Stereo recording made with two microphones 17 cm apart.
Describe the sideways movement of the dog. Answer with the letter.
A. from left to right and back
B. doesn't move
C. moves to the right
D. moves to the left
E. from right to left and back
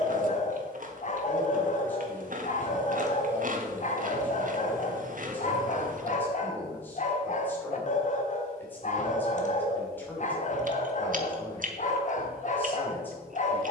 B.